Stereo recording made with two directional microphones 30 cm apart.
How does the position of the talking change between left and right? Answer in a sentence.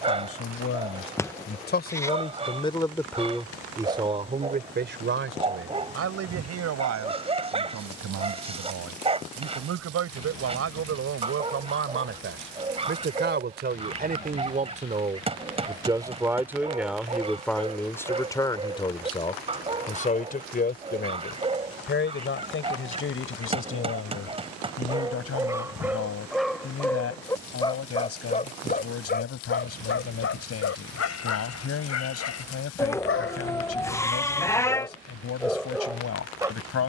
You can hear the talking move from left to right and back again.